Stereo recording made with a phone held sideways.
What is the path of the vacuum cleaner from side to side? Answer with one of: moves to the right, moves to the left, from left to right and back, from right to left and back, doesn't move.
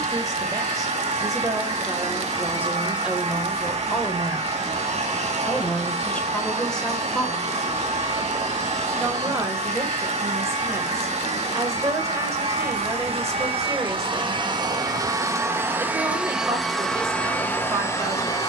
moves to the left.